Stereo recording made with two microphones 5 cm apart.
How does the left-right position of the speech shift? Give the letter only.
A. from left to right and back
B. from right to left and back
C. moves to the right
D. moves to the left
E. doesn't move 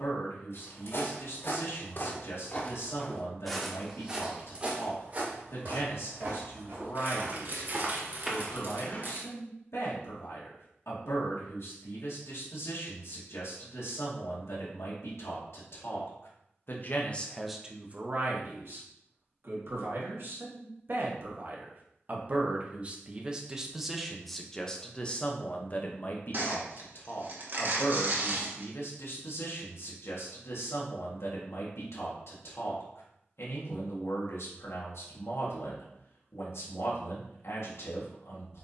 A.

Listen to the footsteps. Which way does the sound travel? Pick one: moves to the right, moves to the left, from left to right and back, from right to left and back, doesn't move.
from left to right and back.